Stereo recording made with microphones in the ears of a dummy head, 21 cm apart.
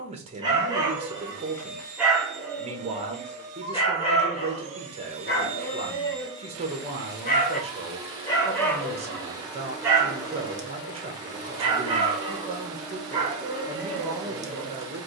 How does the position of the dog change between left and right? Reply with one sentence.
In this clip you hear the dog move from right to left and back again.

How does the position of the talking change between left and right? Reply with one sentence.
You can hear the talking stay put.